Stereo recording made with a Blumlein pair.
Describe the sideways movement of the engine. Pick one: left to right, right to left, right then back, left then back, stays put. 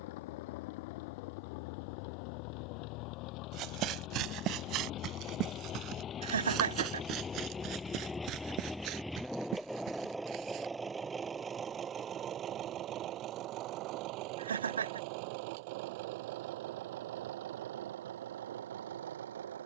left to right.